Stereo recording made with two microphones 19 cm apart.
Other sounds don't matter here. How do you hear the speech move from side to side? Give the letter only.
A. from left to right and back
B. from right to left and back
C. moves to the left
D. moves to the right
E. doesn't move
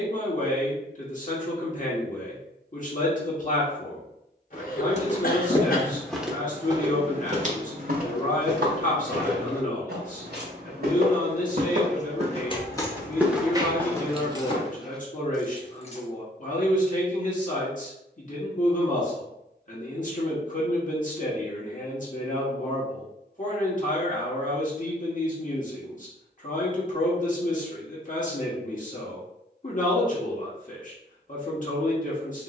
E.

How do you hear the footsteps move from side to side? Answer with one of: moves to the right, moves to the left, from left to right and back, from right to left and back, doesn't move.
from left to right and back.